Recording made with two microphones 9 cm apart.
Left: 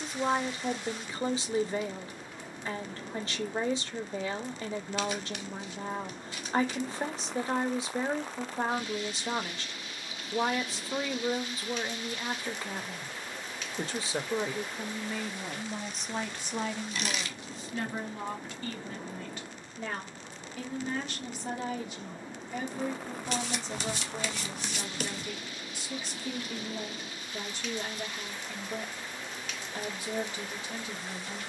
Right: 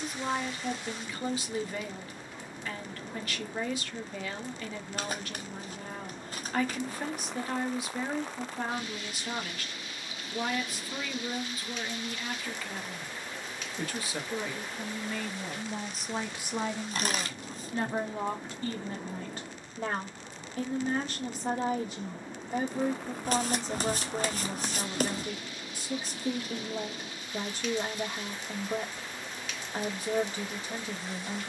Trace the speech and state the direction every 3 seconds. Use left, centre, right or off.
left, left, left, left, left, centre, right, right, right, right, right.